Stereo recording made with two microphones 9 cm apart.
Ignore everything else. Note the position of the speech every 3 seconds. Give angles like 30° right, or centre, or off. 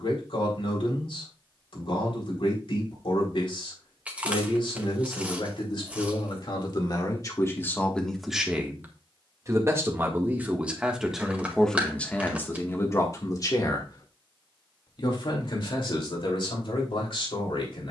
70° left, 70° left, 30° left, 10° right, 30° left, 60° left.